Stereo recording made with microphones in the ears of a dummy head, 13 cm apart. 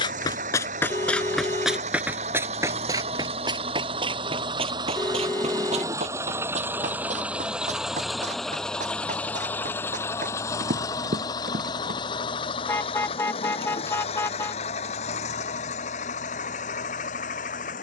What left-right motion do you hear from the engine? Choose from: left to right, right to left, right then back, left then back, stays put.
right to left.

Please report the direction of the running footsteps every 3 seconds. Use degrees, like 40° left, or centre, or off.
centre, 40° right, 50° right, 60° right, off, off.